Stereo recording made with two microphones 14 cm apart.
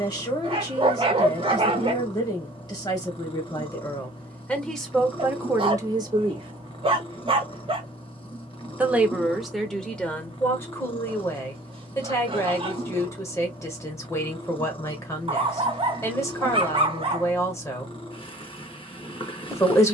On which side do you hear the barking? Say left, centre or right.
right.